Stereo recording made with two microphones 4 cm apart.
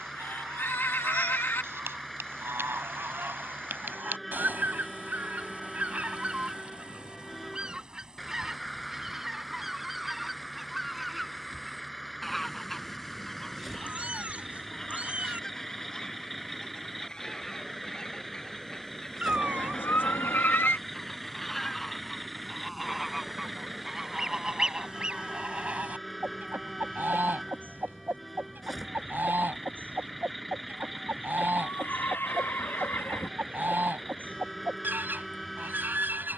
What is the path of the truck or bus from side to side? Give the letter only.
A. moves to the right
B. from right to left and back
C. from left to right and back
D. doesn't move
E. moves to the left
D.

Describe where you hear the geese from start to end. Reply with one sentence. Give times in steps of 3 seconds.
In this clip you hear the geese on the right from 0 s, in the centre from 9 s and on the right from 24 s.